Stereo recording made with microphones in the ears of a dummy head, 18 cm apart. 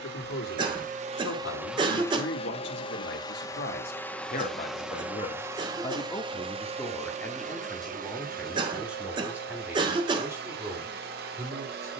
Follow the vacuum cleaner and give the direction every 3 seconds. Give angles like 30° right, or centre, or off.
10° right, centre, 40° right, 50° right.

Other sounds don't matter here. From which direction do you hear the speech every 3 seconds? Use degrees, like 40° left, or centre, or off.
80° left, 50° left, 10° left, 10° right.